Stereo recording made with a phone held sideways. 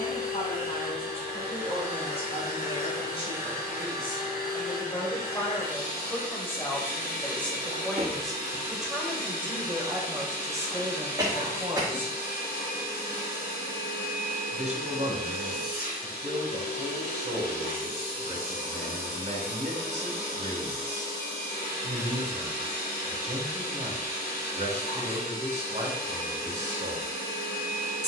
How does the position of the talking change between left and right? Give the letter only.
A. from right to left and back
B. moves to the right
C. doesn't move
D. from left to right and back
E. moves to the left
B.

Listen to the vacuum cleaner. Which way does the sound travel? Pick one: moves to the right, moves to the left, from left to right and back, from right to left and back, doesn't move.
doesn't move.